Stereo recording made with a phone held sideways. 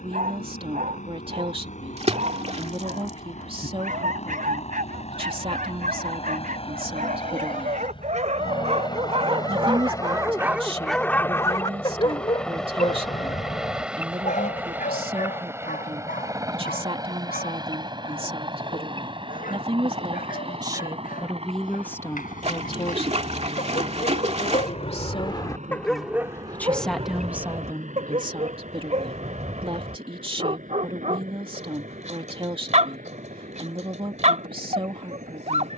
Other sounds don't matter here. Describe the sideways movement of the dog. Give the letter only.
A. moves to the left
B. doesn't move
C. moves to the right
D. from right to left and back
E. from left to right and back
D.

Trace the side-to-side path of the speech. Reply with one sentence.
You can hear the speech move from right to left and back again.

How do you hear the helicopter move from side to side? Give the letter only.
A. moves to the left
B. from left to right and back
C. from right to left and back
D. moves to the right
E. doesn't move
D.